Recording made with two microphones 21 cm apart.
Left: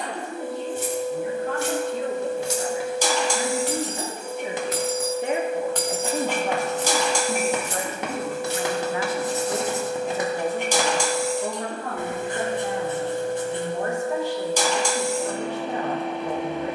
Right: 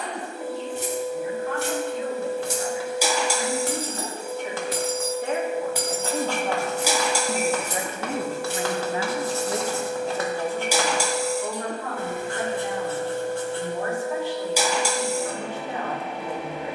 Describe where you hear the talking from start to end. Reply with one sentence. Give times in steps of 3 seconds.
In this clip you hear the talking on the left from 0 s, in the centre from 6 s and on the left from 12 s.